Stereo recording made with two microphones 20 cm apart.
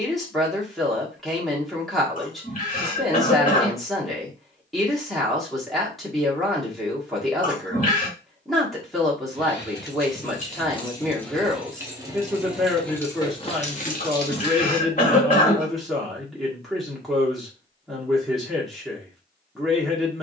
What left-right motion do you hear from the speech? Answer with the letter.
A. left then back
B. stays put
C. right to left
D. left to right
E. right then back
B.